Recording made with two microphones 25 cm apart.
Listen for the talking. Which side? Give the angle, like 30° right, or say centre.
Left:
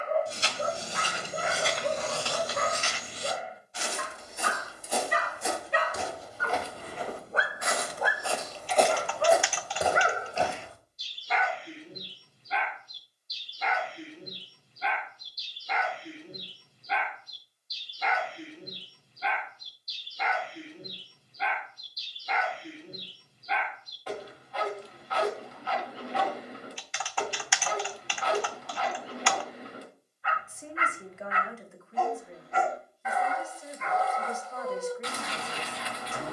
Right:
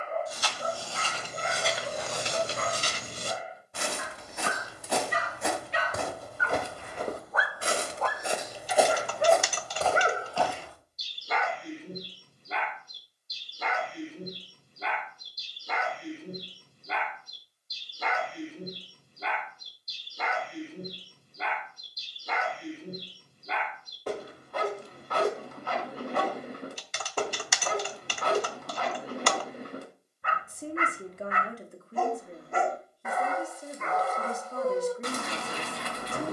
40° right.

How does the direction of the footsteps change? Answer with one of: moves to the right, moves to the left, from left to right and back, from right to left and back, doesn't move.
from left to right and back.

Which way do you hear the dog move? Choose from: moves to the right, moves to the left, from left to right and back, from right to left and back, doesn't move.
moves to the right.